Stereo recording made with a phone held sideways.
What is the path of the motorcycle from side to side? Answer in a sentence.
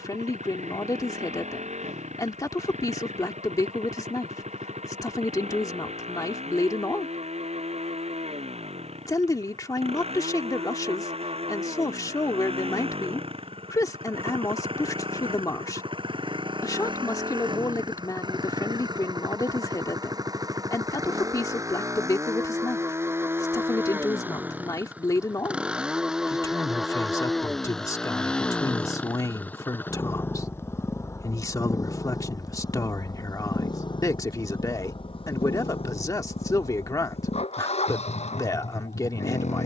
You can hear the motorcycle move from right to left.